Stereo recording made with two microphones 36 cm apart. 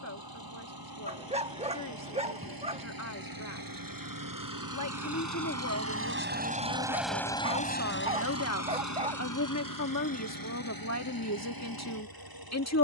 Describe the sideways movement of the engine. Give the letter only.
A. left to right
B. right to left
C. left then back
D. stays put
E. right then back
B.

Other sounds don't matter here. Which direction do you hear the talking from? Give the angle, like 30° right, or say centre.
50° left.